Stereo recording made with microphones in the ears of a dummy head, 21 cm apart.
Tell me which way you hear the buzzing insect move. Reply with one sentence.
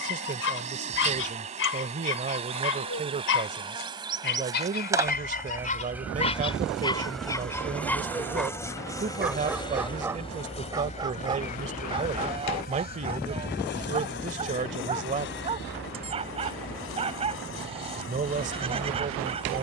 In this clip you hear the buzzing insect go from the right side to the left.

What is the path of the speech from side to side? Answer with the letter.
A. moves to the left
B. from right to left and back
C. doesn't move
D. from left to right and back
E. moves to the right
C.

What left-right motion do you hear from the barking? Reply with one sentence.
You can hear the barking move from left to right.